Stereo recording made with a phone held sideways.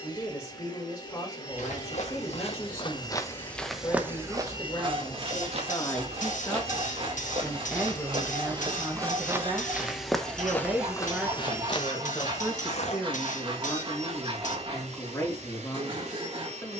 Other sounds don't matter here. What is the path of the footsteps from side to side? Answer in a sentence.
You can hear the footsteps move from left to right and back again.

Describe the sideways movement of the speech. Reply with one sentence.
In this clip you hear the speech go right and come back.